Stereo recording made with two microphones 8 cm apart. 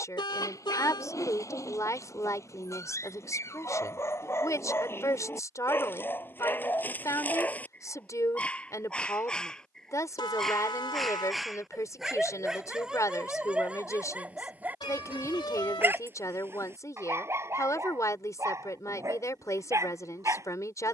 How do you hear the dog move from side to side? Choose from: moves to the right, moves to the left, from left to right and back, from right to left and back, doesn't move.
moves to the right.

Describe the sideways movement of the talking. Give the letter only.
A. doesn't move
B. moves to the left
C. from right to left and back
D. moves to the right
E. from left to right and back
A.